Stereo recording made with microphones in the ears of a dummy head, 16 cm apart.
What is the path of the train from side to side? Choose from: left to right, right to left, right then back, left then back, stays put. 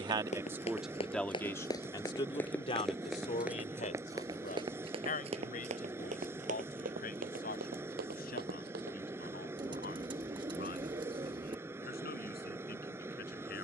stays put.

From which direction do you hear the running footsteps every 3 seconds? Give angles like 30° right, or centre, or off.
30° left, 20° right, 60° right, off, off.